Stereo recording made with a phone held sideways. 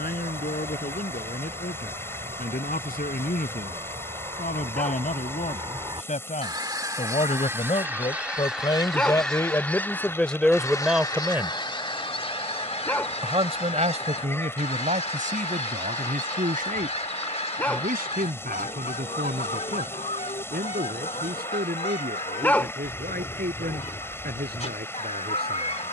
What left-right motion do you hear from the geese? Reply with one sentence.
In this clip you hear the geese travel towards the left.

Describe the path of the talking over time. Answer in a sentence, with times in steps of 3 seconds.
In this clip you hear the talking on the left from 0 s, in the centre from 9 s and on the right from 12 s.